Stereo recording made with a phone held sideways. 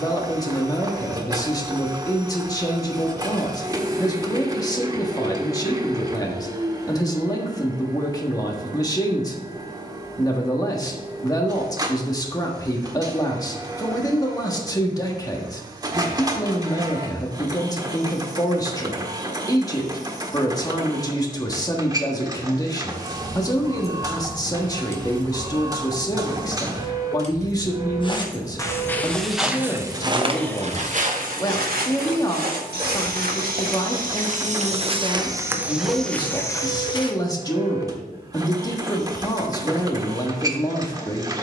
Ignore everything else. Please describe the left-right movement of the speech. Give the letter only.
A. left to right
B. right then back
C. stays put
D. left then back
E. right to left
C.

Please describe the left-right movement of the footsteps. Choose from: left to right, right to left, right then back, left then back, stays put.
right then back.